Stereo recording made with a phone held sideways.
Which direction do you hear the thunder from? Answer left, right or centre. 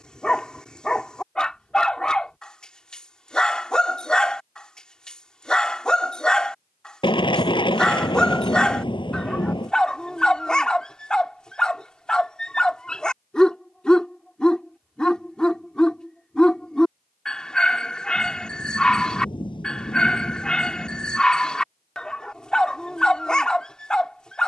left.